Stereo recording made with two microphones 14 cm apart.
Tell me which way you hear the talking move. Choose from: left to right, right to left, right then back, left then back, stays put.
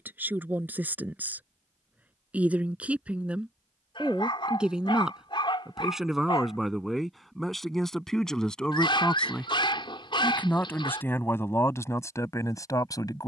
right to left.